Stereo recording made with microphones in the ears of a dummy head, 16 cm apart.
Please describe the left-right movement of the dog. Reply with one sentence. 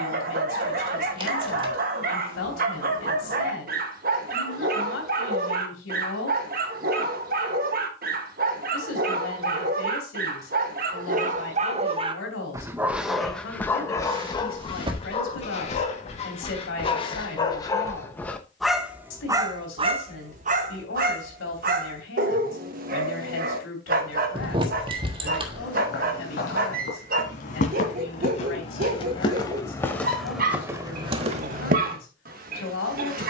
You can hear the dog move from right to left and back again.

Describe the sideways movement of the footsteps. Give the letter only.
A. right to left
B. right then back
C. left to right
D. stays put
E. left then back
C.